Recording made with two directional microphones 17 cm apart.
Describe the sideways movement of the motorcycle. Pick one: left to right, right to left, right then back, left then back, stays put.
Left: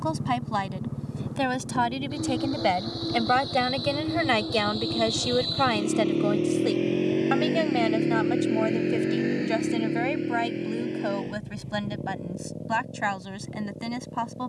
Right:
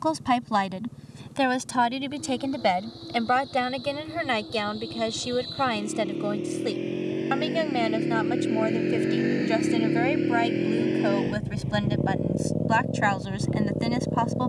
left to right.